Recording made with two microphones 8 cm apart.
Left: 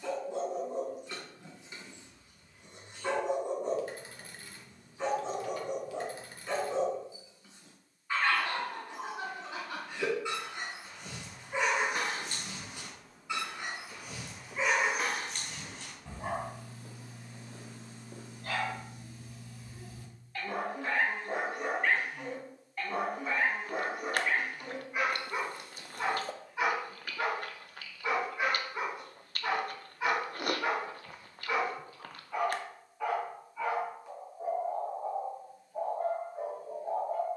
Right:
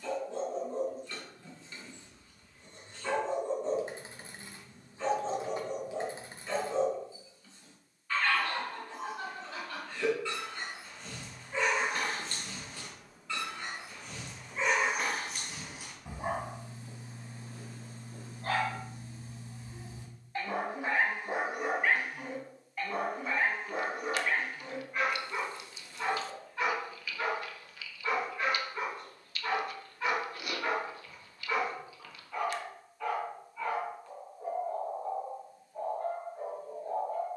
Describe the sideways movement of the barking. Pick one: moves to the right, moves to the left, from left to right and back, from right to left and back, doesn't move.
from left to right and back.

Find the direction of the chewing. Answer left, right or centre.
left.